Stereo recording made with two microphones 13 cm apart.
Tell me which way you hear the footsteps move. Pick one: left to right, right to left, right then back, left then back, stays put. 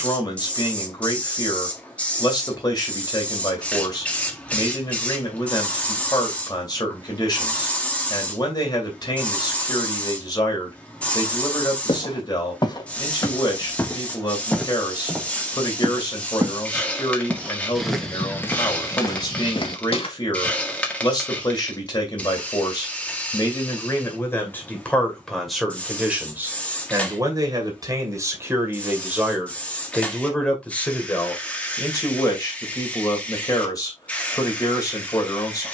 right then back.